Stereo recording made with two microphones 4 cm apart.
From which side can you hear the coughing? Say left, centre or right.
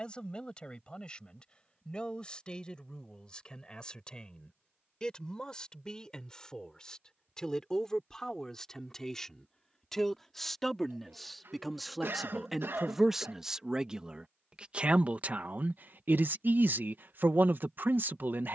right.